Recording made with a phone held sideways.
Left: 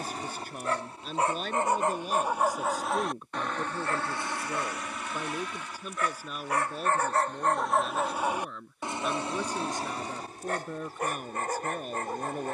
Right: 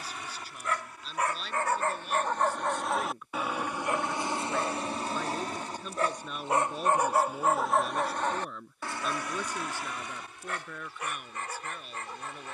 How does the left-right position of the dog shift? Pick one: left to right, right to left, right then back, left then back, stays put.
right then back.